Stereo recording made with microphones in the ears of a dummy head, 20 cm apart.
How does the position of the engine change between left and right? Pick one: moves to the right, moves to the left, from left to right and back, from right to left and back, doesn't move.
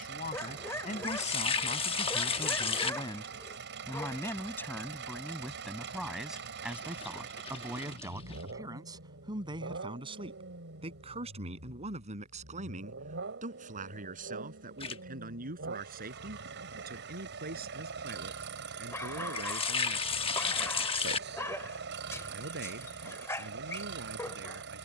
doesn't move.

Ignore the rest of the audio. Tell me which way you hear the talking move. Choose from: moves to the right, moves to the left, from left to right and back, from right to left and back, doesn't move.
moves to the right.